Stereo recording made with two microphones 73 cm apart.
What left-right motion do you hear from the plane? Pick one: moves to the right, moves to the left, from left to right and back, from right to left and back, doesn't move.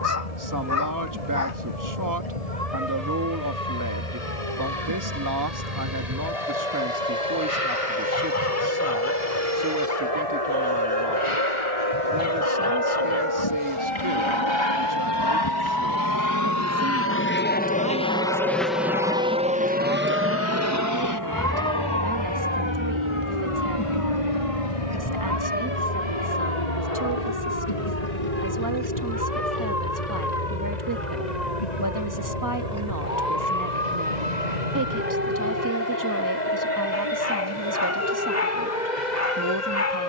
moves to the right.